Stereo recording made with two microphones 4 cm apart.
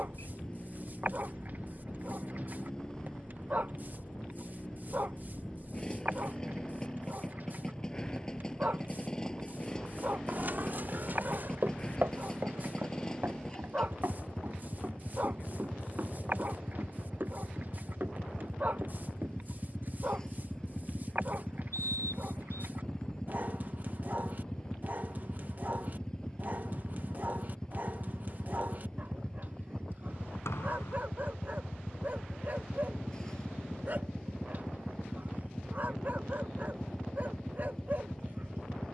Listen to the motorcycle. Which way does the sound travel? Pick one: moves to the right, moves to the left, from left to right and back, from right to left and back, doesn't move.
doesn't move.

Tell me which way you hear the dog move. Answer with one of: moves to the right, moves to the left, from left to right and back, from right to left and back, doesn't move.
doesn't move.